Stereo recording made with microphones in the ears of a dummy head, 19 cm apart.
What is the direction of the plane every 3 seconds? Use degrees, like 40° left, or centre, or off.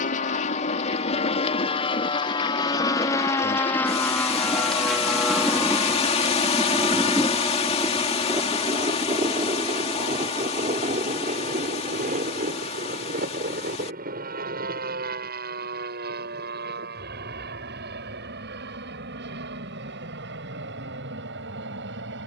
30° left, centre, 20° right, 30° right, 40° right, 40° right, 50° right, 50° right.